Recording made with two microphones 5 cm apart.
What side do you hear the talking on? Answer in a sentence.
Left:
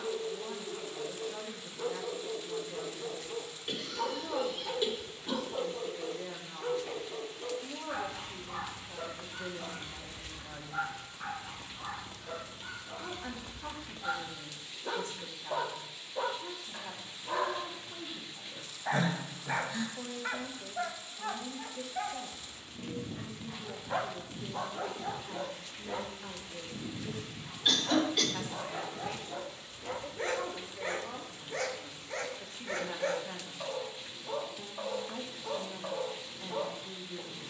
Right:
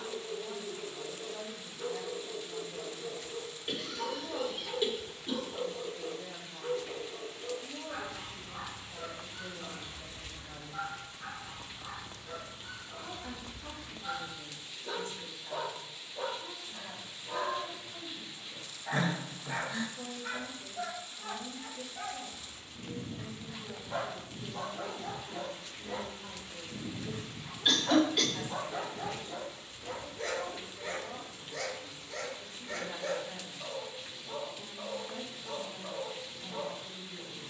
You can hear the talking on the left.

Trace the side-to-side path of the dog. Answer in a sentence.
You can hear the dog move from left to right and back again.